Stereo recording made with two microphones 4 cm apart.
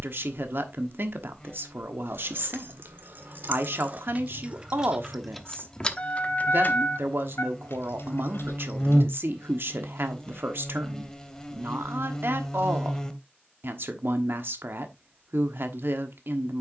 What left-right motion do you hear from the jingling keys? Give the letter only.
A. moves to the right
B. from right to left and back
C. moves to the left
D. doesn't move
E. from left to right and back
C.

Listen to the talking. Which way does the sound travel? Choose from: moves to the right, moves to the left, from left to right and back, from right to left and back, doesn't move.
doesn't move.